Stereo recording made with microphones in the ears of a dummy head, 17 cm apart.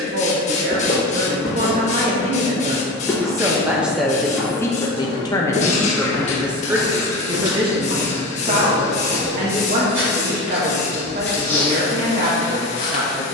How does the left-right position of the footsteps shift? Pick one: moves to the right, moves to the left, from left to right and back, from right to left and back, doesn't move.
from left to right and back.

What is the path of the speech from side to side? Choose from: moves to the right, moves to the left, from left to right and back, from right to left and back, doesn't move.
from right to left and back.